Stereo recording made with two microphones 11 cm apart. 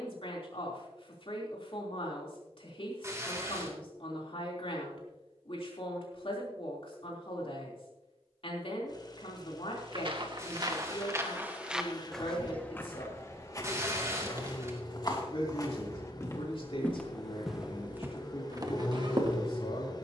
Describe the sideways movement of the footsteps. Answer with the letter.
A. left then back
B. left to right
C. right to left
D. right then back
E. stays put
A.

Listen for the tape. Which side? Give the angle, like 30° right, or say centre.
30° right.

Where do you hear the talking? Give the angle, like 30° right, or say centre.
60° left.